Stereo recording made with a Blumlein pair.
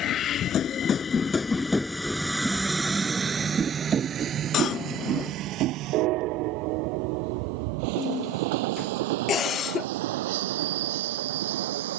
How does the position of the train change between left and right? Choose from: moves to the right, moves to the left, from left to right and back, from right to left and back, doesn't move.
moves to the right.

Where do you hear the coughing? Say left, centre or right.
left.